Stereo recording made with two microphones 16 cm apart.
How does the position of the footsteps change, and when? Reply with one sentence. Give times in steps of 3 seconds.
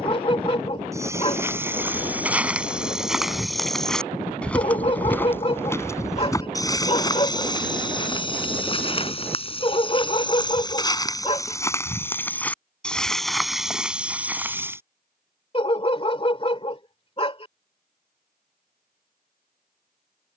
In this clip you hear the footsteps in the centre from 0 s, on the left from 6 s, in the centre from 12 s and not at all from 15 s.